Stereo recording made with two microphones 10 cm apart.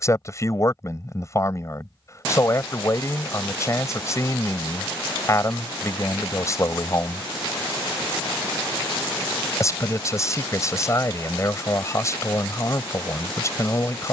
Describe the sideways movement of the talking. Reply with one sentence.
In this clip you hear the talking stay in one place.